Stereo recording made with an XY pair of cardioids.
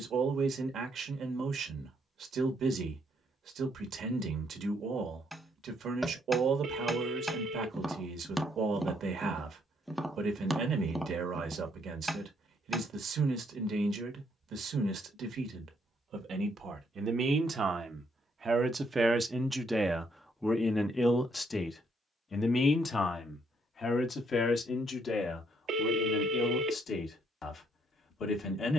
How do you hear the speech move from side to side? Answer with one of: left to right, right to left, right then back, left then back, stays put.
right to left.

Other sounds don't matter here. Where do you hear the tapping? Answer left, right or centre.
centre.